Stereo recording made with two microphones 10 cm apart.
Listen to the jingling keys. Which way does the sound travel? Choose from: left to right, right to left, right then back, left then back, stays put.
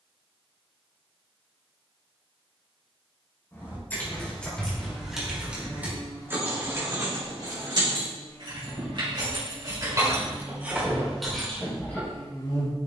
right then back.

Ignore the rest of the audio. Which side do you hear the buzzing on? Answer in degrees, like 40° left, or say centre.
40° left.